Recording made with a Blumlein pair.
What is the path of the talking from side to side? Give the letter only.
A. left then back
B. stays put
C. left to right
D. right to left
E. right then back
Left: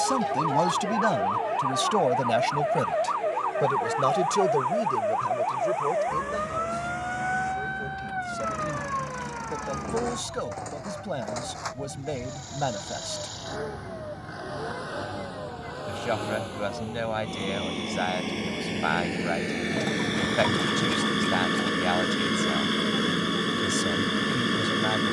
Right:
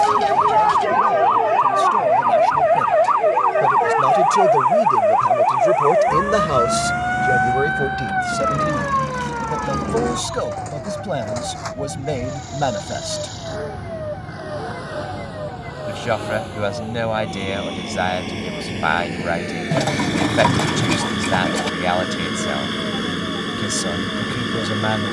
C.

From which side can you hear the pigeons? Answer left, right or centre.
right.